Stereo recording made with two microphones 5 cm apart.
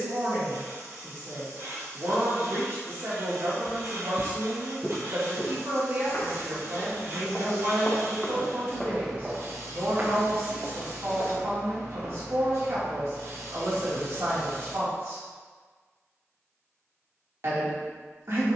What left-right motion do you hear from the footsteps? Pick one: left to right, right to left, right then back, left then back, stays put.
left then back.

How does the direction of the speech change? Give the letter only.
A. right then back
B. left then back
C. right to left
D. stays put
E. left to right
D.